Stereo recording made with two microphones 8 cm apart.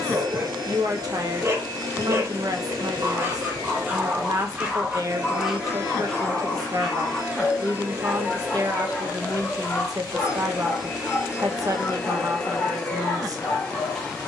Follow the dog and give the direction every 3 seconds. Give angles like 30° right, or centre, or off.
40° right, 20° right, 10° left, 20° left, 20° left.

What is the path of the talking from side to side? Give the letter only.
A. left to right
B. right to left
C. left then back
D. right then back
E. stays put
E.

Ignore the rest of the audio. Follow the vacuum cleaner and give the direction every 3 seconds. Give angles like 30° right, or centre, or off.
60° right, 60° right, 30° right, 10° right, 10° left.